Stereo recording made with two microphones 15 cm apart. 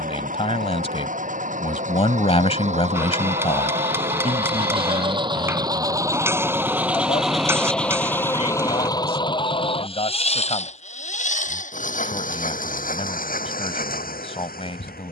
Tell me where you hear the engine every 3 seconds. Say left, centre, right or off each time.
right, right, centre, left, left.